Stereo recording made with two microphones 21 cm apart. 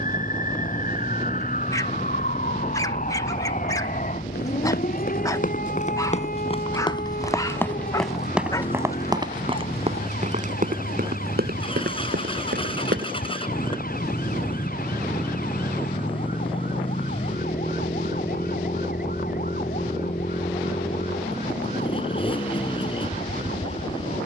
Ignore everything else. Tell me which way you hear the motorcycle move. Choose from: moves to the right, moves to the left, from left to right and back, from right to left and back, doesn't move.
doesn't move.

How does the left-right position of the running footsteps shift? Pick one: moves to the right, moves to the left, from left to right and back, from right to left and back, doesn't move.
moves to the right.